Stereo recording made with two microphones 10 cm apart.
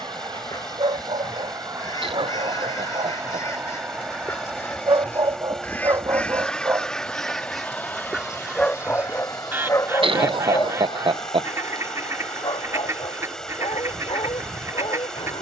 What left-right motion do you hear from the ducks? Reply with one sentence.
You can hear the ducks travel towards the right.